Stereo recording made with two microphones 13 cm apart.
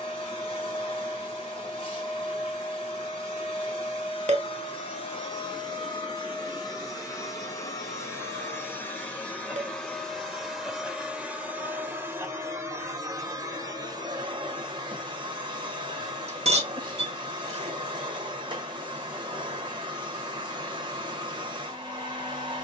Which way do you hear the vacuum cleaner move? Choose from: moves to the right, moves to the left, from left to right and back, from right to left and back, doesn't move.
moves to the right.